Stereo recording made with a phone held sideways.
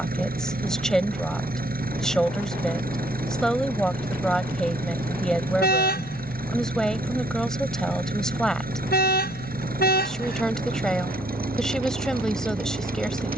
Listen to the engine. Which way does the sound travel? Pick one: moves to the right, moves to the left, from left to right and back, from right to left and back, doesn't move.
doesn't move.